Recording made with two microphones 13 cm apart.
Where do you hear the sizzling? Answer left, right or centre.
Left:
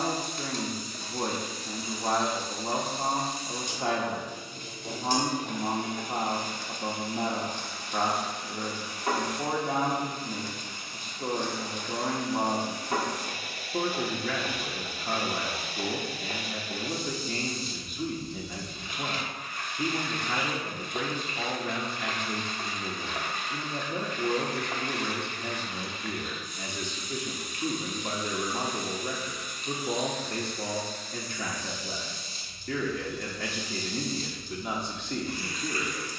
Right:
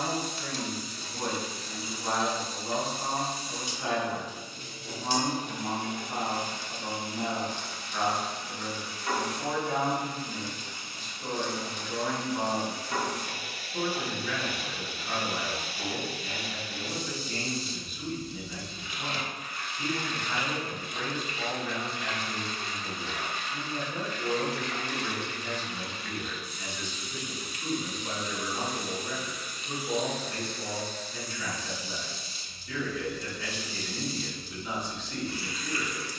left.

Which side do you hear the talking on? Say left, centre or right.
left.